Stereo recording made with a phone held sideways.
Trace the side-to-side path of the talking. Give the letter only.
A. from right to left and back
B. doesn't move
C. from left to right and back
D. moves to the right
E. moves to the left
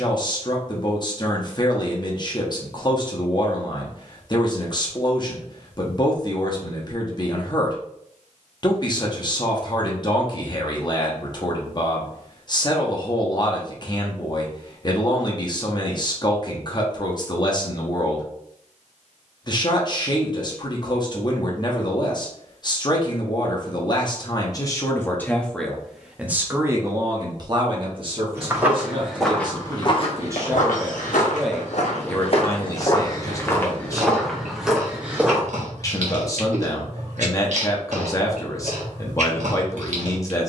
C.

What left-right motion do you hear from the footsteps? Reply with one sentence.
In this clip you hear the footsteps move from right to left and back again.